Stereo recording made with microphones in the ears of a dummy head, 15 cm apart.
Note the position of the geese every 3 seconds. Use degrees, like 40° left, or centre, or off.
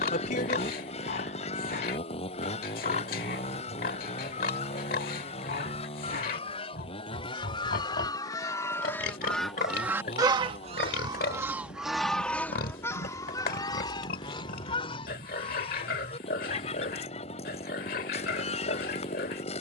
40° left, 40° left, 30° left, 10° right, 20° left, 40° left, 40° left.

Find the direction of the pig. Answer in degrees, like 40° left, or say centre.
60° left.